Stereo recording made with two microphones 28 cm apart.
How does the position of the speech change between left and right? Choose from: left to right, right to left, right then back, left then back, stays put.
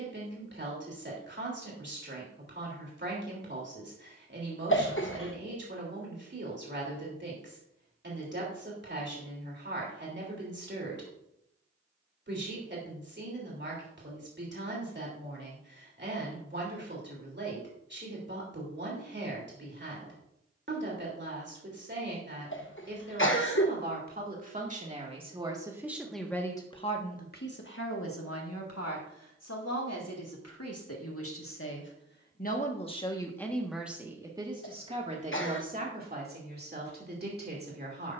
left then back.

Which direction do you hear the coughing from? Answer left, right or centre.
left.